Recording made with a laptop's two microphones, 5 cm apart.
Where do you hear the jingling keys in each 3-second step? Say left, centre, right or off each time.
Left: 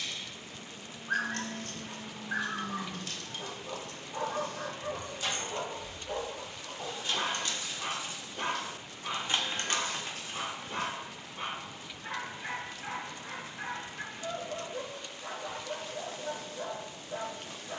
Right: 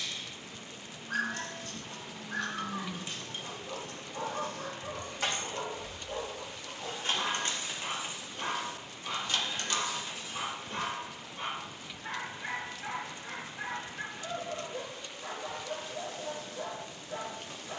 left, right, right, left, off, off.